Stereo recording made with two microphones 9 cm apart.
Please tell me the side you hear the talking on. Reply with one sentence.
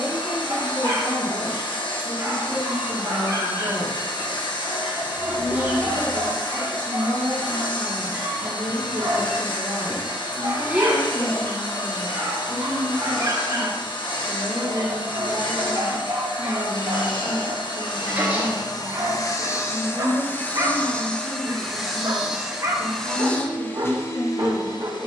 You can hear the talking on the right.